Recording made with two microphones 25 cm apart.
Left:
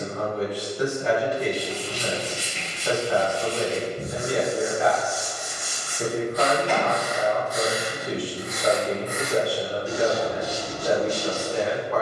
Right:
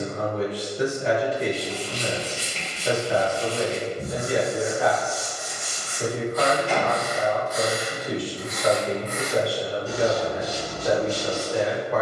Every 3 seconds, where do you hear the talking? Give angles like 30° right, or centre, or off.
20° right, 10° right, 30° left, 10° left.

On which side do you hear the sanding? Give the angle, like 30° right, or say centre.
70° left.